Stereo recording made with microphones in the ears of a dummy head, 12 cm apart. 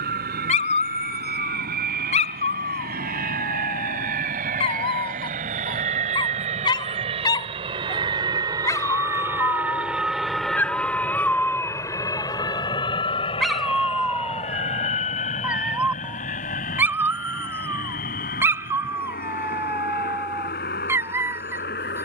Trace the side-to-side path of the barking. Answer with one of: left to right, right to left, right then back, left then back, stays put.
left to right.